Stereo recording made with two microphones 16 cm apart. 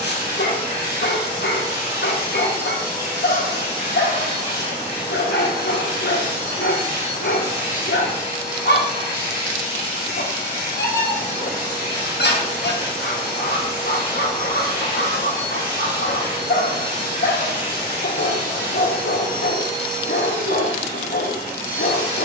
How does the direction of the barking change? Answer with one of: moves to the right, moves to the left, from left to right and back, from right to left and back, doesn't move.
doesn't move.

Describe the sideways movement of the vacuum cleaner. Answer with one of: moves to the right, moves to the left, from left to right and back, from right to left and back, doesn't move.
doesn't move.